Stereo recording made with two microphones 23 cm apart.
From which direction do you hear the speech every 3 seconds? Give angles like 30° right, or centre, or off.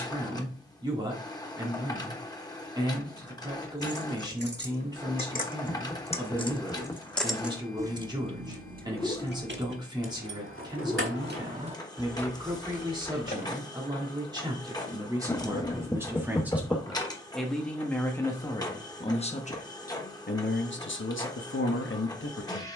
20° right, 20° right, 20° right, 20° right, 20° right, 10° right, 30° left, 60° left.